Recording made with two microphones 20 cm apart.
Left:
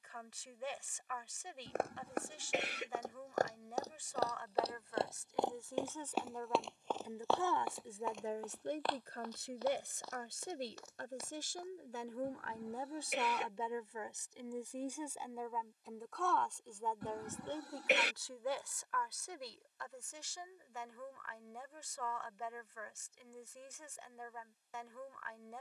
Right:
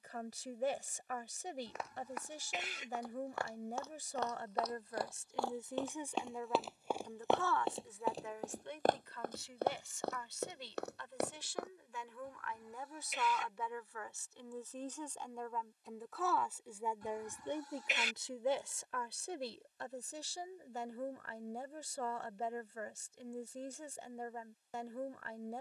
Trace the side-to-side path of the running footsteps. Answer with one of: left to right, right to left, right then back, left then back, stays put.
left to right.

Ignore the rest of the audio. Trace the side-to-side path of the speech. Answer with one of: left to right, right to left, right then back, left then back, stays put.
left then back.